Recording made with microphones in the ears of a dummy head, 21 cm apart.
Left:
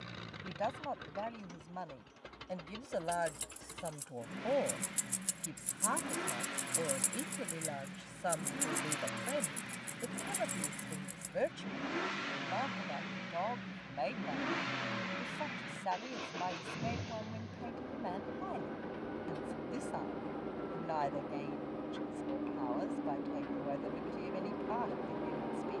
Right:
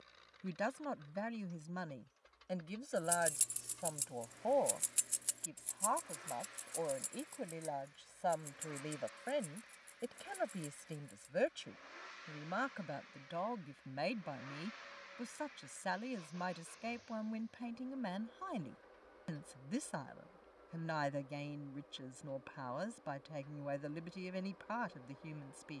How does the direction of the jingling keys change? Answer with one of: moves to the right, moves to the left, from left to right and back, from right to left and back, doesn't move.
moves to the left.